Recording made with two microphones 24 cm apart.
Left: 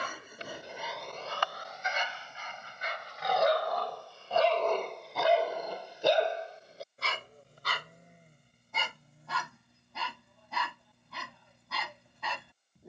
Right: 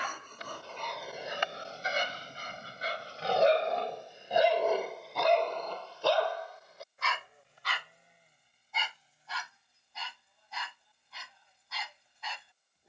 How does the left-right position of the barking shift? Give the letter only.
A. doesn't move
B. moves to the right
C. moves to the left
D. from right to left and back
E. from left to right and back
E.